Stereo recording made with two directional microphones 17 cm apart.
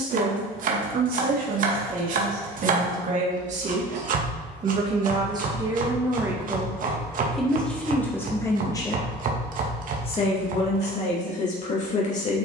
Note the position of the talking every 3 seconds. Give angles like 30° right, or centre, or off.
50° right, 30° right, 10° left, 40° left.